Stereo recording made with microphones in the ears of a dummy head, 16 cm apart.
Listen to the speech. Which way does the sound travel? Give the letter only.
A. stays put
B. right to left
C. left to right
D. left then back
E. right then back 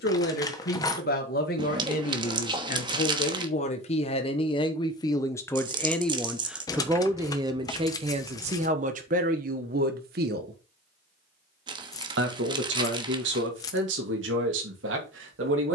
C.